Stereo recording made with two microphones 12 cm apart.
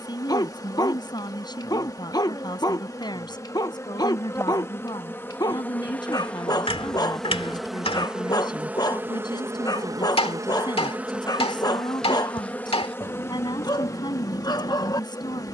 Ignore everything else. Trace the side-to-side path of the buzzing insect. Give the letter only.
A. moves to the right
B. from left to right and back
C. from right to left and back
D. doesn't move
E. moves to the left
B.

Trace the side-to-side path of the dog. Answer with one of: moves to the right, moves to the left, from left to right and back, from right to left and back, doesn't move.
doesn't move.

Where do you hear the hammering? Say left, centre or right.
left.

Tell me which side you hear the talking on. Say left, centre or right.
left.